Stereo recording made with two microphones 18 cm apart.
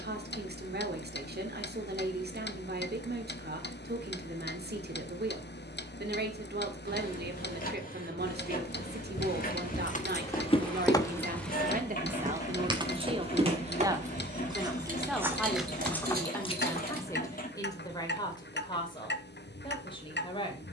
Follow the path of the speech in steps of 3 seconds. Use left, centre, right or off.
right, right, right, right, right, centre, left.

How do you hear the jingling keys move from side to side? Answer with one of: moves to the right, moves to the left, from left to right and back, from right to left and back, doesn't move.
moves to the right.